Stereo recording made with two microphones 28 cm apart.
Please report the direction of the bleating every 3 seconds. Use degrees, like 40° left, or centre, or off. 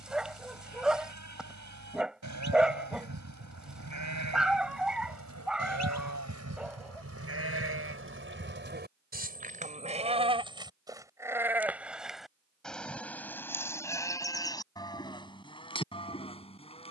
80° right, 80° right, 50° right, 20° right, 10° left, 20° left.